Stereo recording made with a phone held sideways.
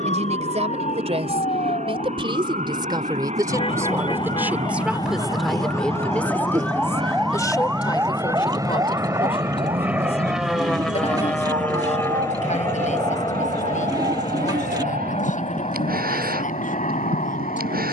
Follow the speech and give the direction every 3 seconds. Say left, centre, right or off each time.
right, centre, left, left, left, left.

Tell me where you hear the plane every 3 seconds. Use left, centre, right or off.
right, right, right, centre, left, left.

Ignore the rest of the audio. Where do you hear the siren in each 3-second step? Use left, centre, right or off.
left, left, centre, right, right, right.